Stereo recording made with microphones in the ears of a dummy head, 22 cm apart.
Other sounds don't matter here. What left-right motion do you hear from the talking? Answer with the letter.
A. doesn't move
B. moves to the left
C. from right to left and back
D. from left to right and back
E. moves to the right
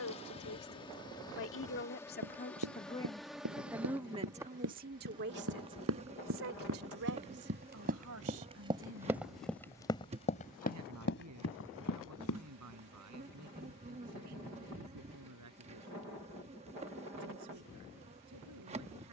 E.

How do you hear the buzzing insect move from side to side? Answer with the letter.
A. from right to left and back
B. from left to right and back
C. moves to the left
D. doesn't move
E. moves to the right
E.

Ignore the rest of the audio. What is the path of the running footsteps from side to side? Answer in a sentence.
You can hear the running footsteps travel towards the left.